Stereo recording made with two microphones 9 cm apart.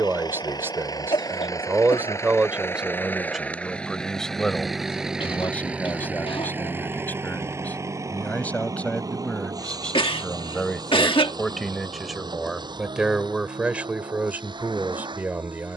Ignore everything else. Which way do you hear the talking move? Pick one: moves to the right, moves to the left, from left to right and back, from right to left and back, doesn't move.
from right to left and back.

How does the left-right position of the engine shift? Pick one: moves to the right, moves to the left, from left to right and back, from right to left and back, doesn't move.
moves to the right.